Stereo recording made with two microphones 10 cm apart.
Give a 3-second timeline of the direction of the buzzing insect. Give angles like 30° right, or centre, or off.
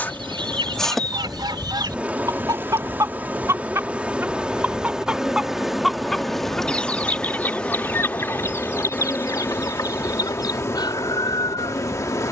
10° right, 10° right, 10° left, 30° left.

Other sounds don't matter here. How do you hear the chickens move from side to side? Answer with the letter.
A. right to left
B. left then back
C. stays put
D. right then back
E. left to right
A.